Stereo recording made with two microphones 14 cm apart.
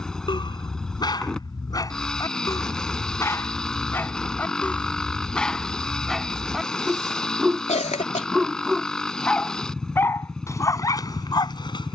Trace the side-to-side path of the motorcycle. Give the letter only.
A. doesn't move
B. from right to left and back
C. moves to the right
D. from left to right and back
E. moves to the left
A.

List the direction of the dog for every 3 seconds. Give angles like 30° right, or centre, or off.
30° left, 10° left, centre, 20° left.